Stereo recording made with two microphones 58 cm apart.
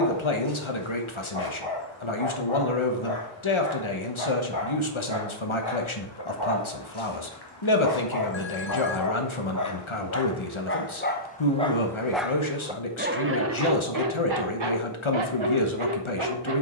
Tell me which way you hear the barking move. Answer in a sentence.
You can hear the barking go from the left side to the right.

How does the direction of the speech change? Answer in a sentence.
In this clip you hear the speech stay put.